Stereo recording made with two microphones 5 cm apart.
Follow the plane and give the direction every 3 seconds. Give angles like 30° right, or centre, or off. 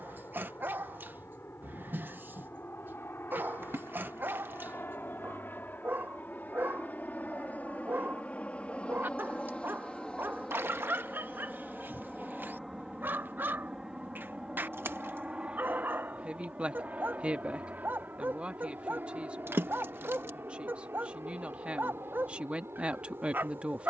60° left, 50° left, 30° left, 10° left, 10° right, 30° right, 40° right, 50° right.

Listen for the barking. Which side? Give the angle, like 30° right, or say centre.
40° right.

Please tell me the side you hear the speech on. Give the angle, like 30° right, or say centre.
20° right.